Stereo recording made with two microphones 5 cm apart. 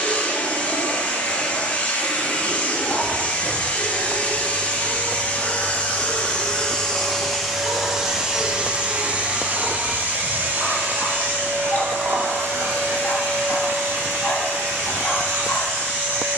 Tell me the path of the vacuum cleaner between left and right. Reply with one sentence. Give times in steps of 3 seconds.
In this clip you hear the vacuum cleaner on the left from 0 s, in the centre from 6 s and on the right from 9 s.